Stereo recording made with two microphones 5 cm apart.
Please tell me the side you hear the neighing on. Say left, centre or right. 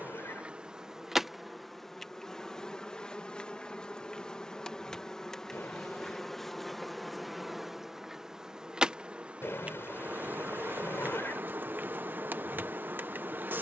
left.